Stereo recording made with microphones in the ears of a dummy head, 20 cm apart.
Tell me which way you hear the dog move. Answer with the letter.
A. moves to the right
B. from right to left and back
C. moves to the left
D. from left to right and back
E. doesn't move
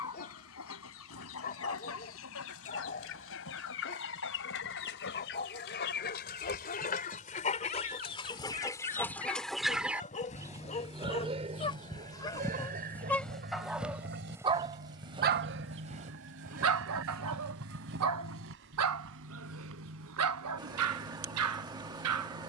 A.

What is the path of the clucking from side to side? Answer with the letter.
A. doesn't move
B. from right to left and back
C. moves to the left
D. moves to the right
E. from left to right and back
D.